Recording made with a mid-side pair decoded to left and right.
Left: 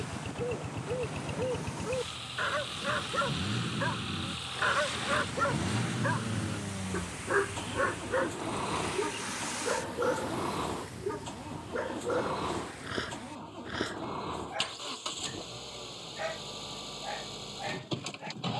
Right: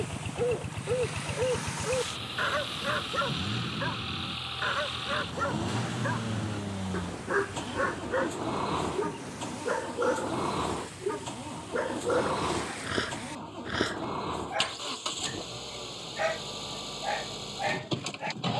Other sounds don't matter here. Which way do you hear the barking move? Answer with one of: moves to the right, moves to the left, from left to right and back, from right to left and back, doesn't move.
from right to left and back.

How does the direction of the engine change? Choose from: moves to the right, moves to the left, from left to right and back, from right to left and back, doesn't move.
doesn't move.